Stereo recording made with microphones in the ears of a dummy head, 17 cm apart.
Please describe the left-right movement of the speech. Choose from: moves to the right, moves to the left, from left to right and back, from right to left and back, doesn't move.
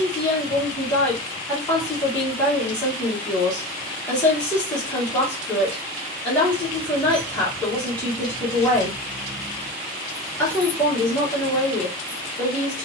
doesn't move.